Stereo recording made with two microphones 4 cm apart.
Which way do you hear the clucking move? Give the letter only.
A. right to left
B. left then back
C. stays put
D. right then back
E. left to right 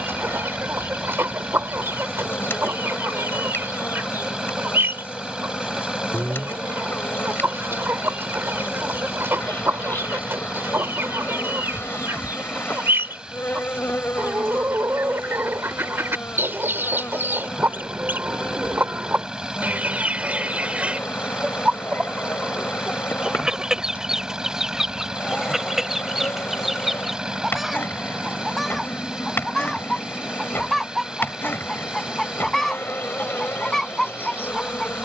A.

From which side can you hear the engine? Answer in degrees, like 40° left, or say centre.
20° right.